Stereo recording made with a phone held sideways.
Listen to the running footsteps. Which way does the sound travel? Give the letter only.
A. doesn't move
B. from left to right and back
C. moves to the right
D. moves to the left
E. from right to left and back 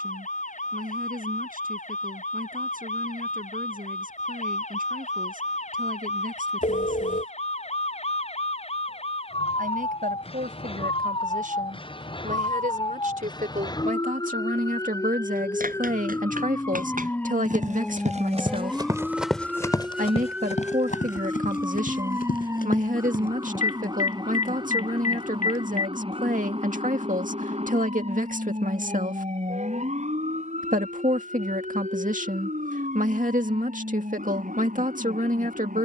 D.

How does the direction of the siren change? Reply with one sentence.
You can hear the siren go from the left side to the right.